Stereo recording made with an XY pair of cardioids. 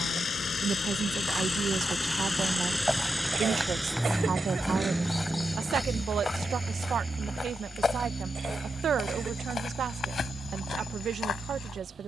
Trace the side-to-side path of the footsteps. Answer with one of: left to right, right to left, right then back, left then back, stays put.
right to left.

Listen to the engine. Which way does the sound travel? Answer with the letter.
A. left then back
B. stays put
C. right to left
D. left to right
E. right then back
D.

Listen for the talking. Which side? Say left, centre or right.
right.